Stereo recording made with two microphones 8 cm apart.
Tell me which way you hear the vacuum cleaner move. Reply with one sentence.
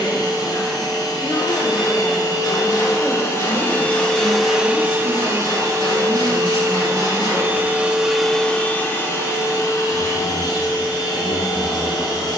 In this clip you hear the vacuum cleaner move from left to right and back again.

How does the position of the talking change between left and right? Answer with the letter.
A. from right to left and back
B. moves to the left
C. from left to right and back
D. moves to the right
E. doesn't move
C.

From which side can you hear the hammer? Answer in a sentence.
You can hear the hammer on the left.